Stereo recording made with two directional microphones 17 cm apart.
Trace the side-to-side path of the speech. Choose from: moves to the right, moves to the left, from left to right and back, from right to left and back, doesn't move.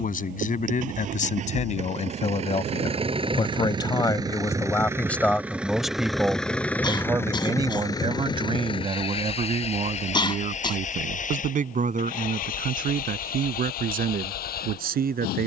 moves to the right.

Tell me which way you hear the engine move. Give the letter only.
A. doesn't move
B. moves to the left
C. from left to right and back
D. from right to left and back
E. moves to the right
B.